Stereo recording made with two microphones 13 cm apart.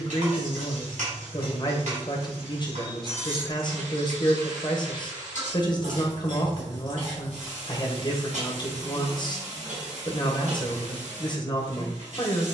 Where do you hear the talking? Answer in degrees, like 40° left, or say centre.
30° left.